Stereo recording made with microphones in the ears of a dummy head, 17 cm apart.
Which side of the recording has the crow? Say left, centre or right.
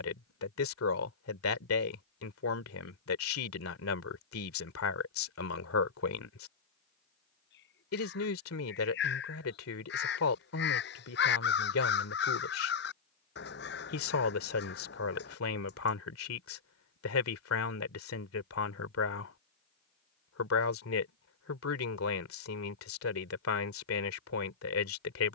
left.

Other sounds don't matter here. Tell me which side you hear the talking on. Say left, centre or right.
left.